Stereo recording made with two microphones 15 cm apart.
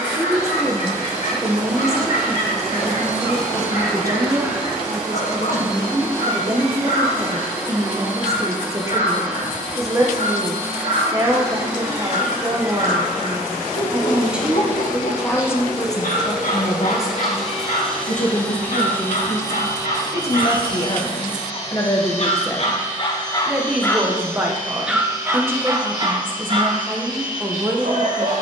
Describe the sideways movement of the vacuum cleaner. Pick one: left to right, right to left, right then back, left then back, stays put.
right to left.